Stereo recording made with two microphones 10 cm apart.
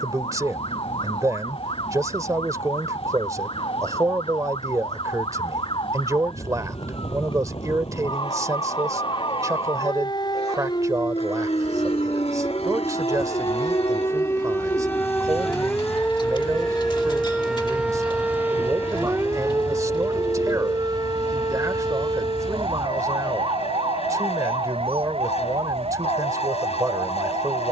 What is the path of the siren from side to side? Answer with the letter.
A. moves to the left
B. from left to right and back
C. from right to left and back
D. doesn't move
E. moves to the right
E.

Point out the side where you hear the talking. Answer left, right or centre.
right.